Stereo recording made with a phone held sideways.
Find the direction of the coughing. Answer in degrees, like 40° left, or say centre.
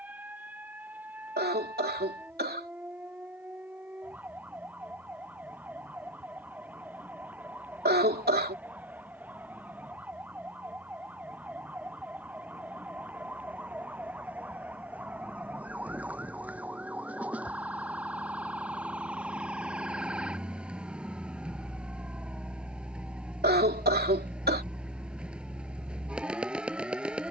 80° right.